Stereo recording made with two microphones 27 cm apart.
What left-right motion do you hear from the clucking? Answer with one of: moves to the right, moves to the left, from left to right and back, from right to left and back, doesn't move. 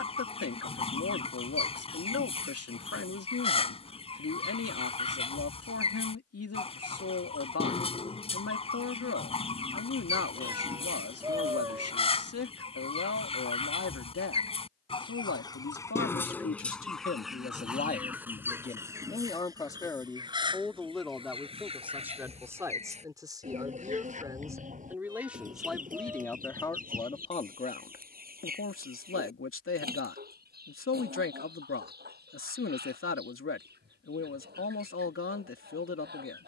moves to the right.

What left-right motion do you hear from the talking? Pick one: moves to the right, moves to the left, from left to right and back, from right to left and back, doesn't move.
from left to right and back.